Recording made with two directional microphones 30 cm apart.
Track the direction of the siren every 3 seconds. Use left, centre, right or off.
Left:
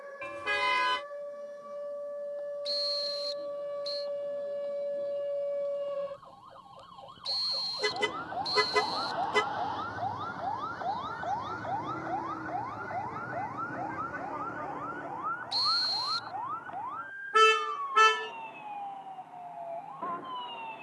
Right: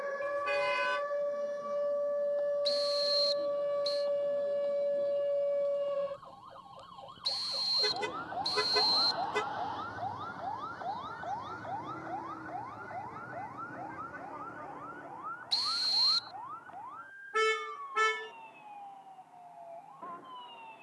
right, right, centre, left, left, left, left.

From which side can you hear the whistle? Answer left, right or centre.
right.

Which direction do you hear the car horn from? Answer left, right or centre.
left.